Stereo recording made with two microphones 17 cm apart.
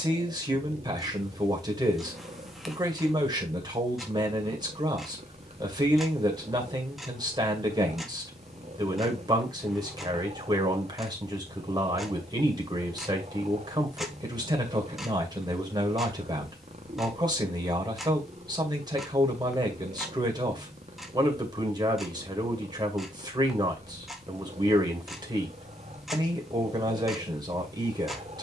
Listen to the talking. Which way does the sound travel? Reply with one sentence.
In this clip you hear the talking stay put.